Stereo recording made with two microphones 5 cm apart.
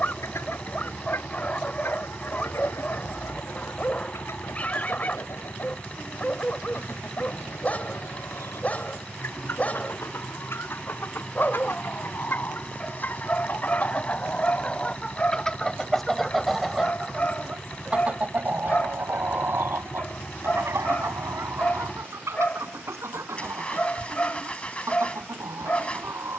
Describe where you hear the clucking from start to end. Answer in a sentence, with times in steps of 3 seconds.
You can hear the clucking on the left from 0 s, in the centre from 15 s and on the right from 18 s.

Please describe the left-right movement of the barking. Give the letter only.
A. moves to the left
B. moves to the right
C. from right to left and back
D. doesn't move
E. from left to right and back
D.